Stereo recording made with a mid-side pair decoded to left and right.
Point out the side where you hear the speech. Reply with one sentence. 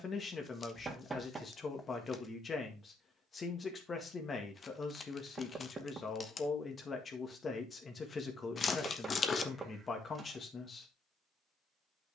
In this clip you hear the speech on the left.